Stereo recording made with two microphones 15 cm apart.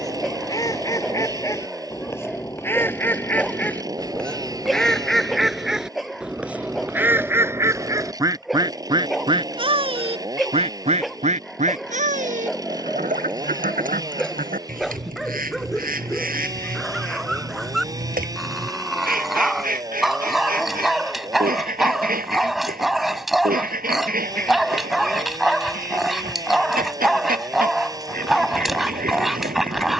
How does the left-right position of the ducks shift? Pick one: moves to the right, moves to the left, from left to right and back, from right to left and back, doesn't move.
moves to the right.